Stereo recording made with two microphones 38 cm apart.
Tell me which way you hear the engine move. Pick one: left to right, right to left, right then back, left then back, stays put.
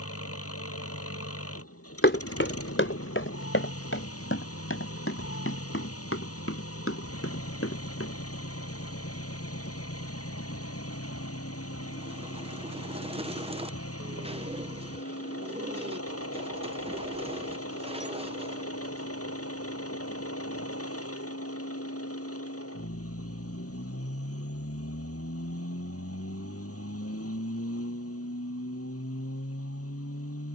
stays put.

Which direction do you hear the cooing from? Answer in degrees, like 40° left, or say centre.
20° right.